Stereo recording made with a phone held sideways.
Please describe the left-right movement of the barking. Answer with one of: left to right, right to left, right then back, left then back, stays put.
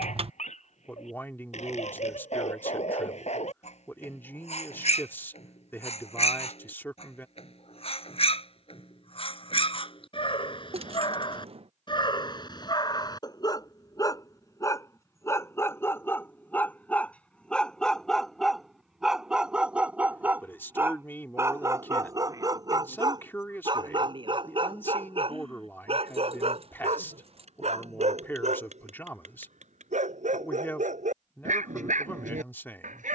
left to right.